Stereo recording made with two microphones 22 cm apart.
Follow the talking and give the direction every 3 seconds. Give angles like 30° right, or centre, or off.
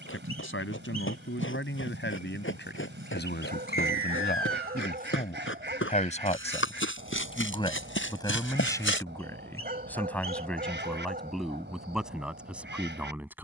60° left, 40° left, 20° left, centre, 10° right.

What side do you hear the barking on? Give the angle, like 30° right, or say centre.
40° right.